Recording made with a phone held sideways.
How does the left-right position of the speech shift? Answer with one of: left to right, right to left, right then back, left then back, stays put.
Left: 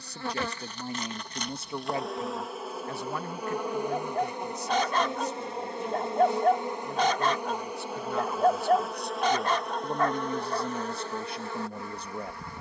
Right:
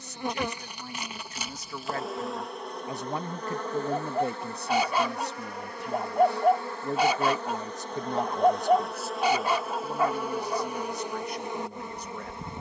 right then back.